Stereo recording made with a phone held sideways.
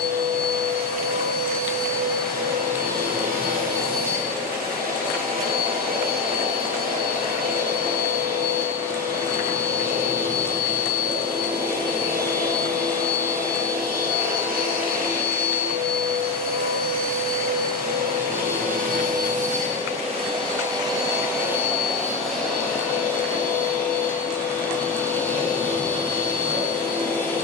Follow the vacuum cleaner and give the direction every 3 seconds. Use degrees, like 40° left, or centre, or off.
70° right, 70° right, 70° right, 70° right, 70° right, 70° right, 50° right, centre, 10° left.